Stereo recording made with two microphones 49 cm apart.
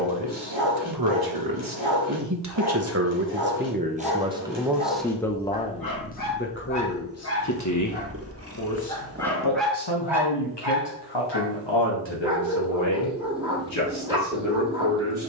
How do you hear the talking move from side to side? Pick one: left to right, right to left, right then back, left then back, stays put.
right to left.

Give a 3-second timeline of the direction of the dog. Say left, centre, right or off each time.
left, left, left, centre, centre.